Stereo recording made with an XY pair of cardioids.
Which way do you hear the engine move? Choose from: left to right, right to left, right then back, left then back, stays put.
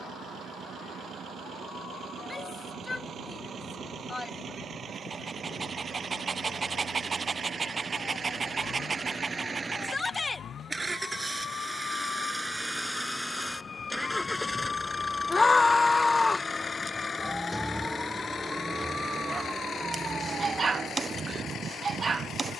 right to left.